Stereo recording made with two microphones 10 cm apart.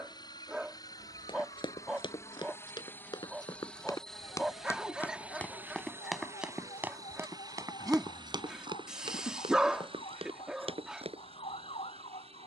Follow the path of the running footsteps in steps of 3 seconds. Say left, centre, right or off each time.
left, left, right, right.